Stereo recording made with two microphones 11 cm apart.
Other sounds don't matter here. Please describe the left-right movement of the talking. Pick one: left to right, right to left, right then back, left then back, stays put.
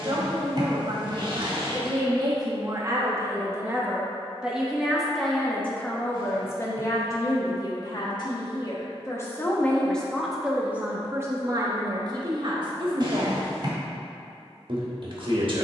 left then back.